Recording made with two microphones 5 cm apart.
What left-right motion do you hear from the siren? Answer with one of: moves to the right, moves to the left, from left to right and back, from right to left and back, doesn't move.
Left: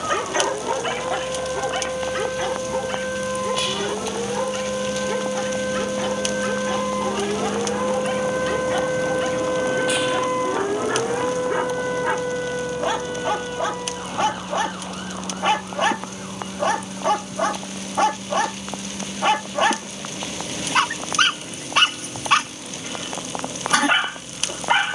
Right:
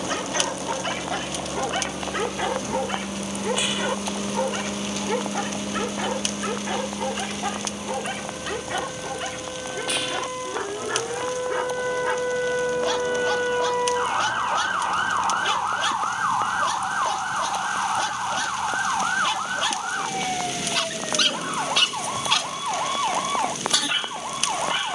moves to the right.